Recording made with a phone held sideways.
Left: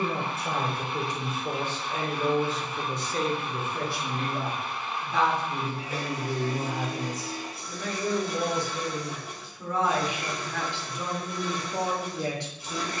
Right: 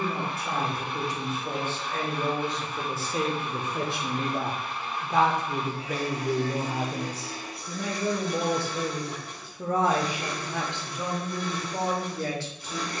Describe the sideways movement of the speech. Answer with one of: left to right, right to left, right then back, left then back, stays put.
right then back.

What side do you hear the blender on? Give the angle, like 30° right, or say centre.
centre.